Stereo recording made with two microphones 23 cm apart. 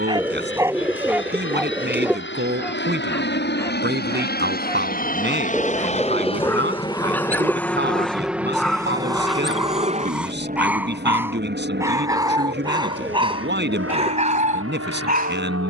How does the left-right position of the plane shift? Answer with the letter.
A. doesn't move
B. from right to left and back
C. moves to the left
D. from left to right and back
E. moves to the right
E.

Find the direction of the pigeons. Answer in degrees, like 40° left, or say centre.
10° right.